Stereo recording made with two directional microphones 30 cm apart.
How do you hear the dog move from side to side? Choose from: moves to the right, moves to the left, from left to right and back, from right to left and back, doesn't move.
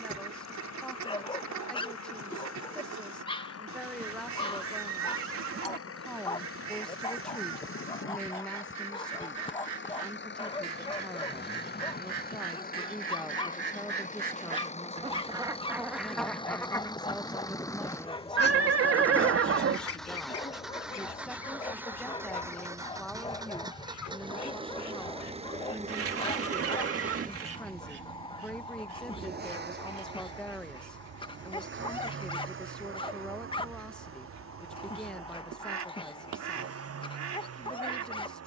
doesn't move.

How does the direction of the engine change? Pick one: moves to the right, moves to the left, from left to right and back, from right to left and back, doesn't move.
moves to the right.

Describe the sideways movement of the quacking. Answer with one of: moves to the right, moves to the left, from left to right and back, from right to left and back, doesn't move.
from right to left and back.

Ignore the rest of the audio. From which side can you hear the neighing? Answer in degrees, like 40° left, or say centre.
50° right.